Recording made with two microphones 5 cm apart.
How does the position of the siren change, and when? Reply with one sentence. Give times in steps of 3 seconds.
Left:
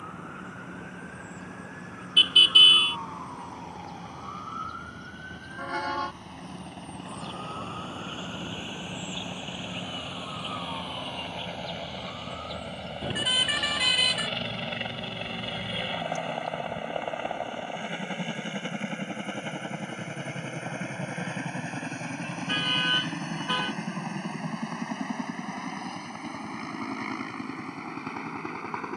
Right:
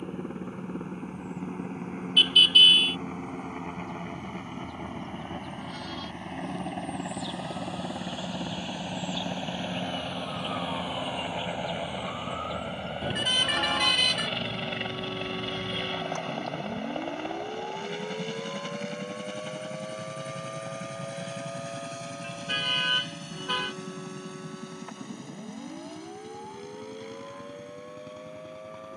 You can hear the siren on the left from 0 s, in the centre from 9 s and on the right from 12 s.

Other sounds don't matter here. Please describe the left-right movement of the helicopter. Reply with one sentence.
In this clip you hear the helicopter travel towards the left.